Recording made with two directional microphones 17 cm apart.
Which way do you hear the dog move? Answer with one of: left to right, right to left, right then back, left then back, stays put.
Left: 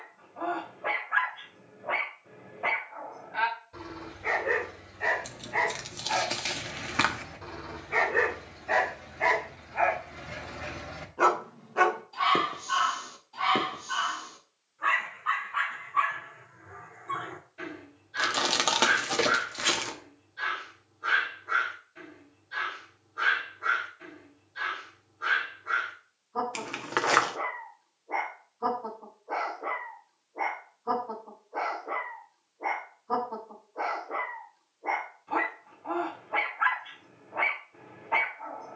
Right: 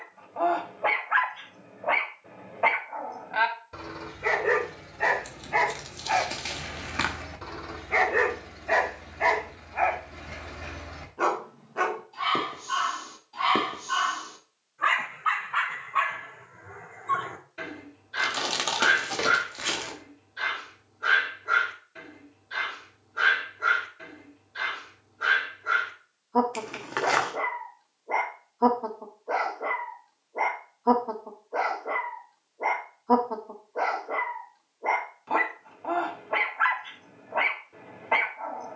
left then back.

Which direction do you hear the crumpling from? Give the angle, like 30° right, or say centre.
20° left.